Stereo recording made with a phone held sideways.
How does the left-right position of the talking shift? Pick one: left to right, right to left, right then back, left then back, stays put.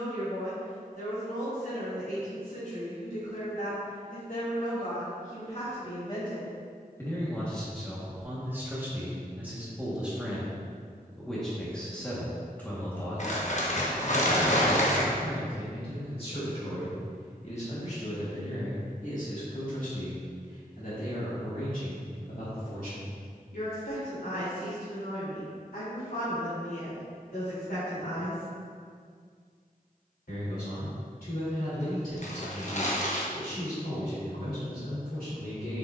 right then back.